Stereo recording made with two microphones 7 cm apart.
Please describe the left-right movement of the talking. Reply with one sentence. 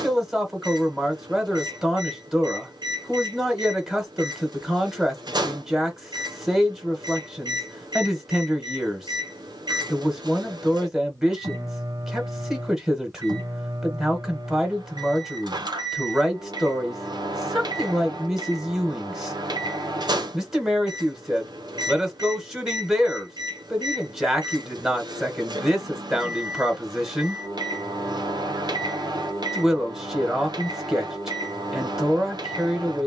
In this clip you hear the talking stay in one place.